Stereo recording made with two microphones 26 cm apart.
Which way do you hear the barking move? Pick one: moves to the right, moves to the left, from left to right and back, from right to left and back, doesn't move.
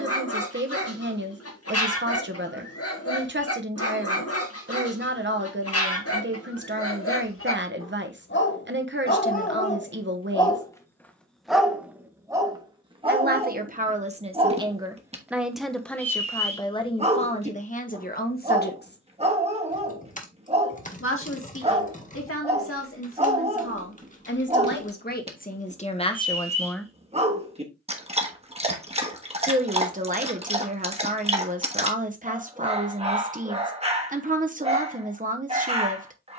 moves to the right.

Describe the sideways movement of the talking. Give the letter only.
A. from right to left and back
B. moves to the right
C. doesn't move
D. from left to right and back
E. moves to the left
A.